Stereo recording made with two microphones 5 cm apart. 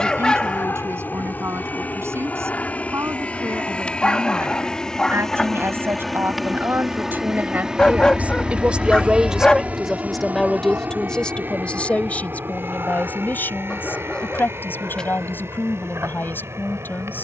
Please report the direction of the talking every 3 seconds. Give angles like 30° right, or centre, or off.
70° right, 60° right, 40° right, 10° left, 40° left, 50° left.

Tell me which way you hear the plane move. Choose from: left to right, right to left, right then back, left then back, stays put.
left to right.